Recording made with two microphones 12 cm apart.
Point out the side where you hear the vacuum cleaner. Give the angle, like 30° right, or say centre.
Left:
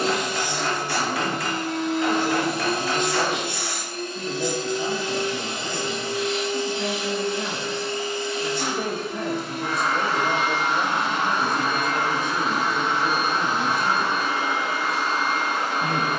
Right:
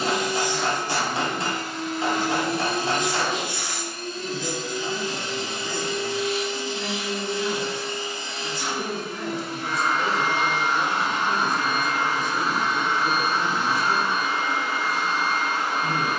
60° left.